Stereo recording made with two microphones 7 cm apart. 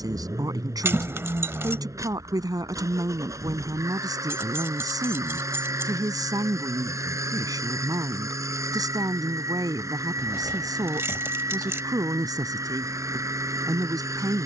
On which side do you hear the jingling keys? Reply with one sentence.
You can hear the jingling keys on the right.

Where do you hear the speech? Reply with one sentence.
In this clip you hear the speech on the right.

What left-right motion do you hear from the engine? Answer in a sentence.
You can hear the engine stay in one place.